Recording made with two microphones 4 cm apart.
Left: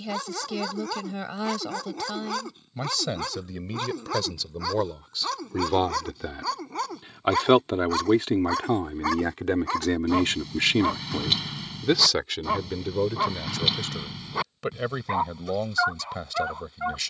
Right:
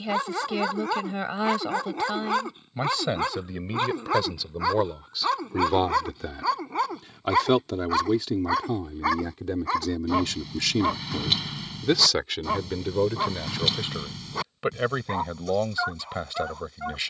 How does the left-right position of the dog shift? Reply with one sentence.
You can hear the dog go from the right side to the left.